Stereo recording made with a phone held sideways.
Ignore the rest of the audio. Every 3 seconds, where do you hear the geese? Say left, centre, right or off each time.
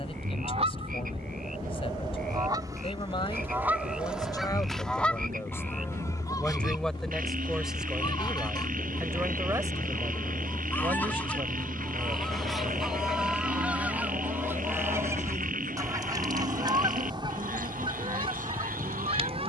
right, centre, left, centre, centre, right, right.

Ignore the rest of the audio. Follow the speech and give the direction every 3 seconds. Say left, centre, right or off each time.
left, left, centre, right, right, right, right.